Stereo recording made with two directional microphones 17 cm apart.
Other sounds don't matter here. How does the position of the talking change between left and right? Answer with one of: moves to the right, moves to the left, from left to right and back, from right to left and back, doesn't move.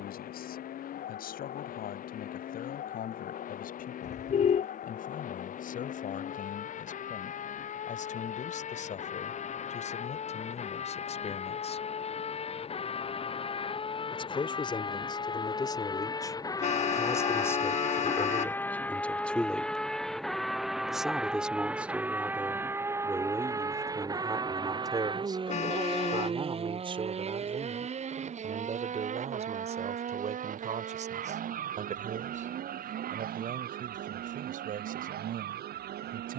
moves to the right.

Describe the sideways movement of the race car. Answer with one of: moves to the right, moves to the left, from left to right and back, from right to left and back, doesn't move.
moves to the right.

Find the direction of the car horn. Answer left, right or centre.
left.